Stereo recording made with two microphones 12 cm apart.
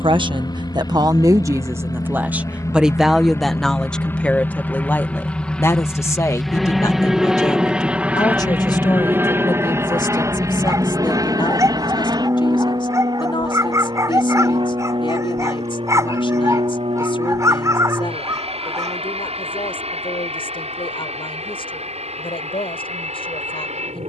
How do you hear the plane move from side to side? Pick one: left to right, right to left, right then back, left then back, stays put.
left to right.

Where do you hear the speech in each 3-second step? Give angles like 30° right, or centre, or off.
30° right, 10° left, 30° left, 40° left, 50° left, 50° left, 50° left, 60° left.